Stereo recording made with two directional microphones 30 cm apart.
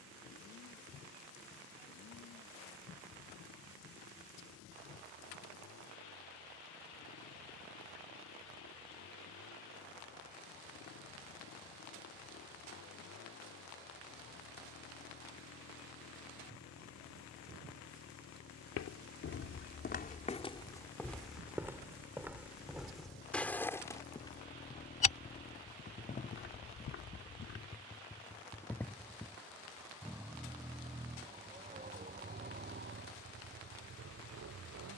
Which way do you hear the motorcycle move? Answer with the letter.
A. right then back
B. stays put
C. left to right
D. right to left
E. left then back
C.